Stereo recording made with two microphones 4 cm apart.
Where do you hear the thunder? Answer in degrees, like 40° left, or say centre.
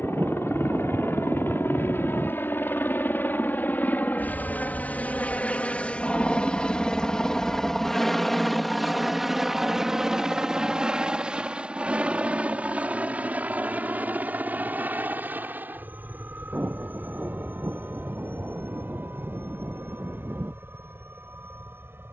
40° right.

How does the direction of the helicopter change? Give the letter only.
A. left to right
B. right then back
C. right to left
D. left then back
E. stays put
A.